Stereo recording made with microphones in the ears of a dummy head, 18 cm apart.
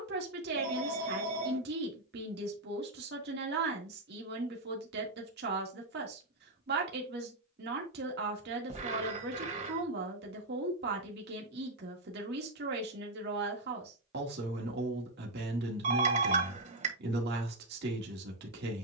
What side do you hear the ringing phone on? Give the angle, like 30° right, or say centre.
40° right.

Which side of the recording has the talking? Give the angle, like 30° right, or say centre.
50° right.